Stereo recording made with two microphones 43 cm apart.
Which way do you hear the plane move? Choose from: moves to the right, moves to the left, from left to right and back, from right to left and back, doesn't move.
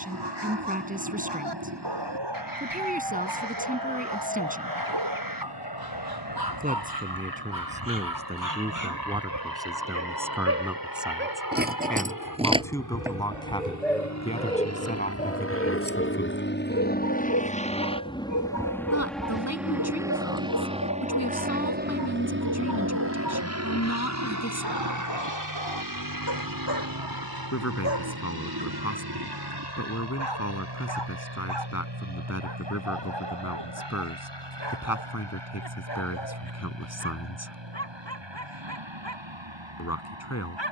moves to the right.